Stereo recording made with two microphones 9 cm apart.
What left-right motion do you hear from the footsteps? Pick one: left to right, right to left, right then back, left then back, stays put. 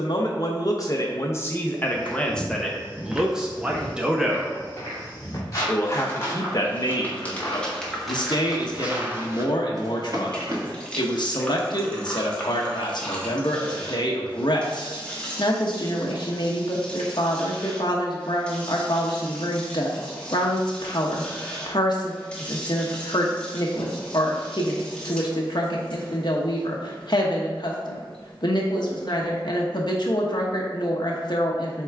left then back.